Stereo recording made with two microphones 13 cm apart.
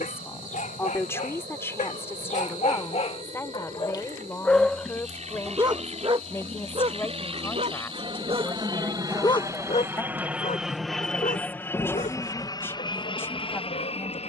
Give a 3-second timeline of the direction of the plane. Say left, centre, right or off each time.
right, right, right, centre, left.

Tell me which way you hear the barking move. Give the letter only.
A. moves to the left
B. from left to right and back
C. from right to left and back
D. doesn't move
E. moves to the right
B.